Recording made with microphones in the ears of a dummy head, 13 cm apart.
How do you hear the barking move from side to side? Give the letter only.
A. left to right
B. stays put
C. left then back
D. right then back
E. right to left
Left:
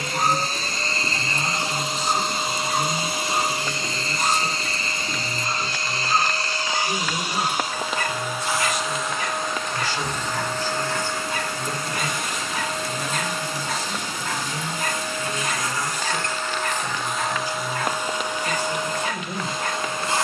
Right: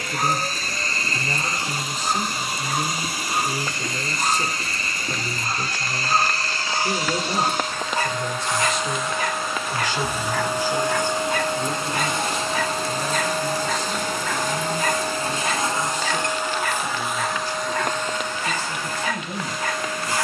A.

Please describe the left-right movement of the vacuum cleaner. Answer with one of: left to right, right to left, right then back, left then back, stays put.
right then back.